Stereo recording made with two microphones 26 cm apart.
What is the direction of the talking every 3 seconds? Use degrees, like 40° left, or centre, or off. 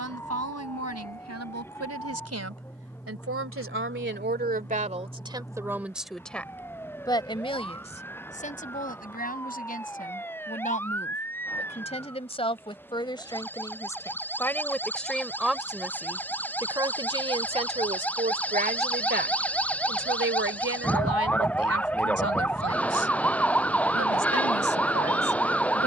80° right, 30° right, 20° left, 30° left, 10° left, 10° right, 40° right, 60° right, 80° right.